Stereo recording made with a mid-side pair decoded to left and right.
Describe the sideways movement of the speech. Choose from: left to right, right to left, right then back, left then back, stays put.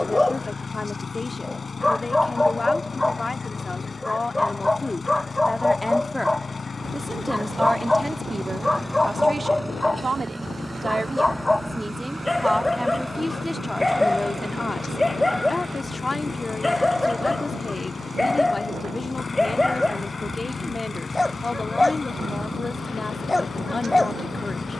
right then back.